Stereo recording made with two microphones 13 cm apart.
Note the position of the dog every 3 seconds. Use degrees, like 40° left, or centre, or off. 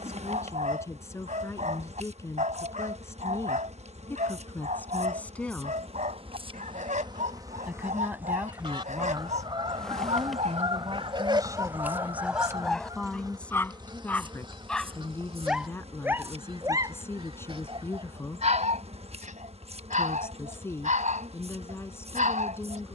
70° right, 70° right, 70° right, 50° right, centre, 30° right, 70° right, 70° right.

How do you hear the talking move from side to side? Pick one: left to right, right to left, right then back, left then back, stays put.
right then back.